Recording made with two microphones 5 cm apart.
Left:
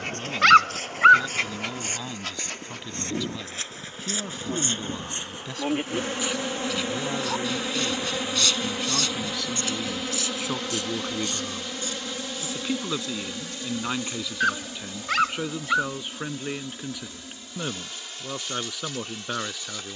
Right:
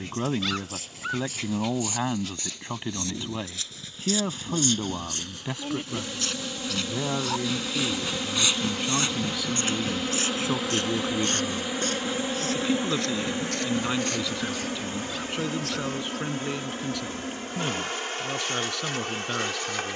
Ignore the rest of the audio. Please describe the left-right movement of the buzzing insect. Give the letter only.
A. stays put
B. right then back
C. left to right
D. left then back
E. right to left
C.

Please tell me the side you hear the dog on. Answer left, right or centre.
left.